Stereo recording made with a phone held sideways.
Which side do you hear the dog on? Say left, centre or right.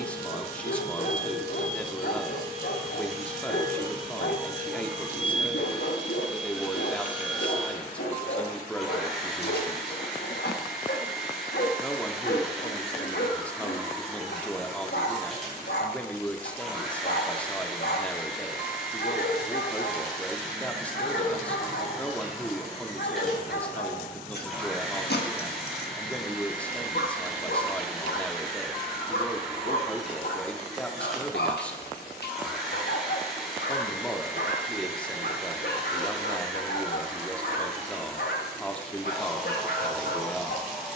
left.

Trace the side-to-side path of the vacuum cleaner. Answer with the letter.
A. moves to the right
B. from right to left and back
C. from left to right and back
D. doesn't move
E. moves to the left
D.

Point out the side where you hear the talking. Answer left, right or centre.
centre.